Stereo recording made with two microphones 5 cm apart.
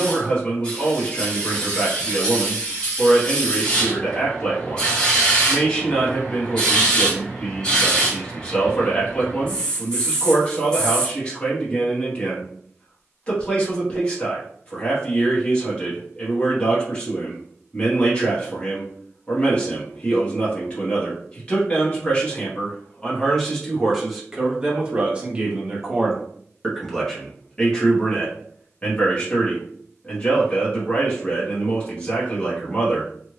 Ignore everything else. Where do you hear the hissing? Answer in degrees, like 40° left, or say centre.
20° left.